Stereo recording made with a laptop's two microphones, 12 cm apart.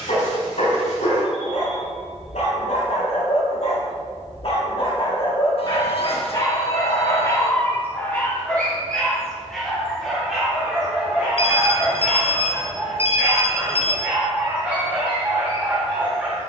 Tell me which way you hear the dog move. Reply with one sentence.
You can hear the dog move from left to right.